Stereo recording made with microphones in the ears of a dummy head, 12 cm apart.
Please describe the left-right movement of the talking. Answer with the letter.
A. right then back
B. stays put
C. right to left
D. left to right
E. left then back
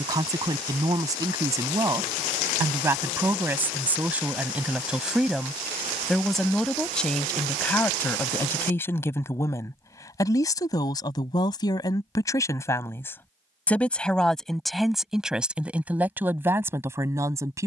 E.